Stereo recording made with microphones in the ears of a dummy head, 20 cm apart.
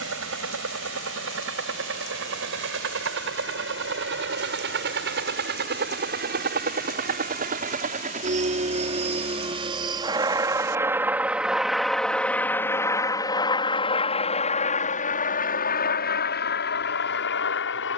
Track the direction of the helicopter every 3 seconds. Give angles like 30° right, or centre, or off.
60° right, 50° right, 40° right, 10° right, 20° left, 40° left.